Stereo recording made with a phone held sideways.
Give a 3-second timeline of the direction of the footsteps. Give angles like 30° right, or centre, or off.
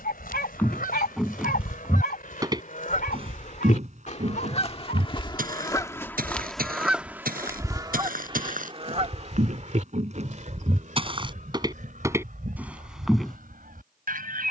10° right, 60° right, 70° right, 40° right, 10° right.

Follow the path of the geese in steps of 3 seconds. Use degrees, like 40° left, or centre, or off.
70° left, 40° left, 20° right, 50° right, 70° right.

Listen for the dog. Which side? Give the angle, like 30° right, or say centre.
80° left.